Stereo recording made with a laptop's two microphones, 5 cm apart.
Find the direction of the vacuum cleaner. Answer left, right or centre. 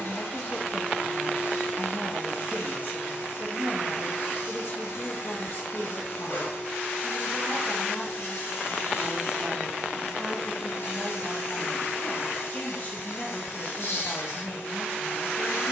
left.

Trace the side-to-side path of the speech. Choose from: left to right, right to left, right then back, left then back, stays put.
right then back.